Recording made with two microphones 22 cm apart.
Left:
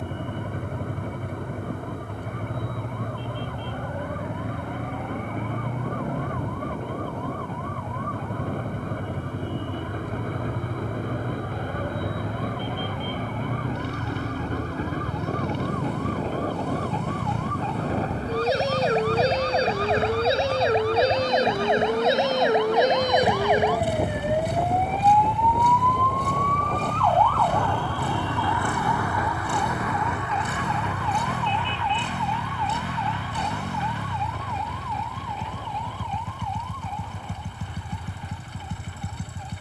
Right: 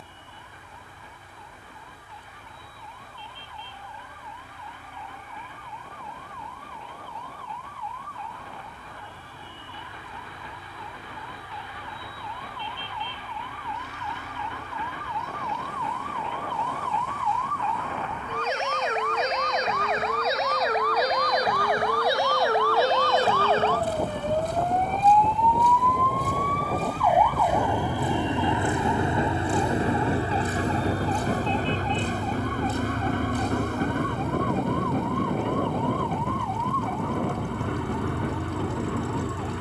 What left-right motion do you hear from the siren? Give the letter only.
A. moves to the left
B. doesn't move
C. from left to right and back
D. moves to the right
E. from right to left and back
D.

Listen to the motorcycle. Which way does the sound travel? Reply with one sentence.
In this clip you hear the motorcycle stay in one place.